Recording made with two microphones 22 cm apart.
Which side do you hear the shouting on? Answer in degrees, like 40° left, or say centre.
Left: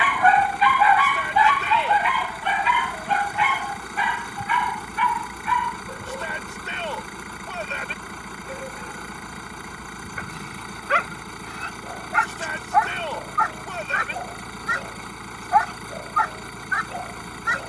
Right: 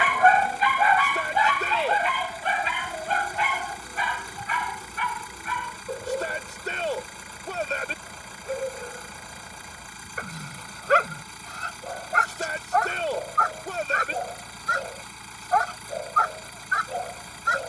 40° right.